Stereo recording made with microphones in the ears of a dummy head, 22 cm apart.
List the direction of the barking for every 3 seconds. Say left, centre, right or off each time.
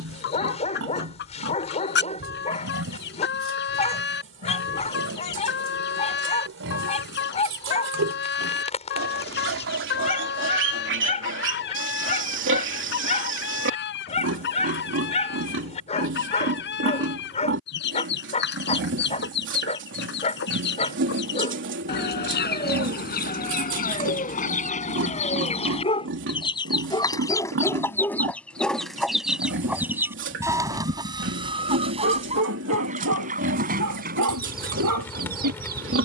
left, left, left, left, left, left, left, left, left, centre, right, right.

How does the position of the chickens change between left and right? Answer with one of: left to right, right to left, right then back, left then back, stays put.
left to right.